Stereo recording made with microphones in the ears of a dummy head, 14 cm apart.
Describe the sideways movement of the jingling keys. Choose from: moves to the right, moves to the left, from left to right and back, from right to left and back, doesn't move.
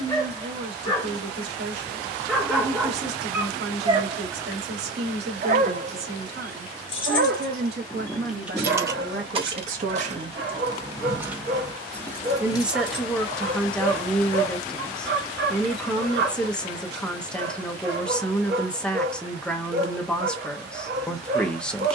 from left to right and back.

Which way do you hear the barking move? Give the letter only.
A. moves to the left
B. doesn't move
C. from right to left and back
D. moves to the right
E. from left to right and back
D.